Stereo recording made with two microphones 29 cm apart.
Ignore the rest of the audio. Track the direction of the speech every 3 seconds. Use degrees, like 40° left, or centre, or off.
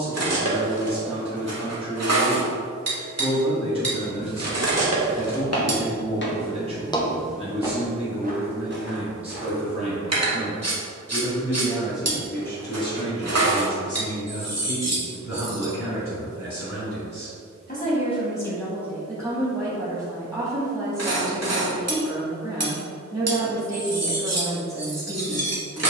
20° right, 20° right, 20° right, 20° right, 30° left, 50° left, centre, 10° right, 10° right.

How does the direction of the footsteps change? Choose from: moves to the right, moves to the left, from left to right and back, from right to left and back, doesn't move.
moves to the right.